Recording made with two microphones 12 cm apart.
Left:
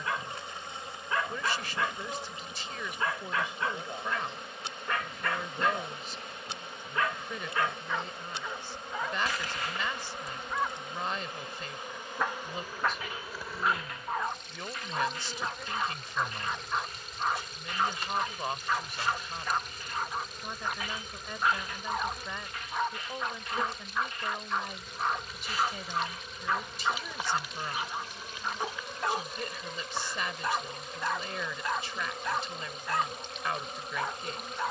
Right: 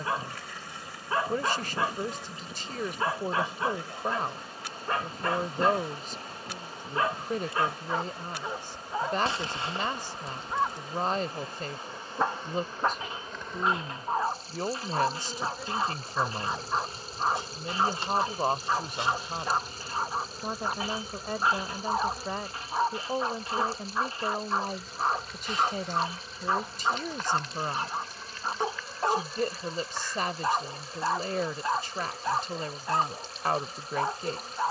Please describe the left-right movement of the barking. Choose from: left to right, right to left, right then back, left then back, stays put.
stays put.